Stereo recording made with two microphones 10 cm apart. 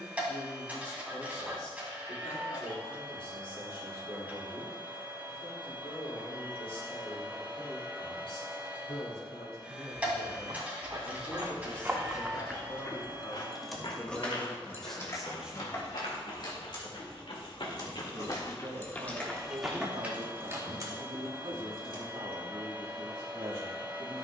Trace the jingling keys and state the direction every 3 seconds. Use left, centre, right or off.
off, off, off, right, centre, left, centre, right.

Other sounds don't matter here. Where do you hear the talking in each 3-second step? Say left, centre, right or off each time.
left, left, left, left, left, centre, right, right.